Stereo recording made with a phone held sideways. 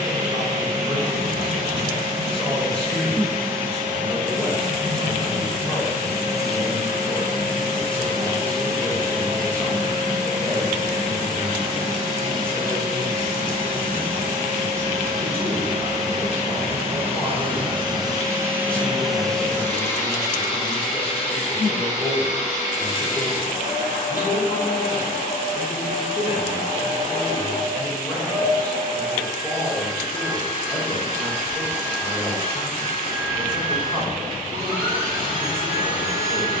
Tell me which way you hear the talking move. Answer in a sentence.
In this clip you hear the talking stay put.